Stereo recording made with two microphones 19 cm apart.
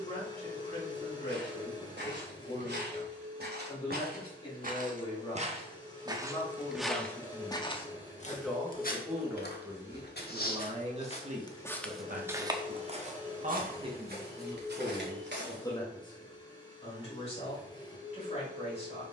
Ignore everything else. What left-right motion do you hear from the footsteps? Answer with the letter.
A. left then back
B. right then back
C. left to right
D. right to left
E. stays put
A.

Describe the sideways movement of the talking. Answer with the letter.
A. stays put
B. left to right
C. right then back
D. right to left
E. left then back
C.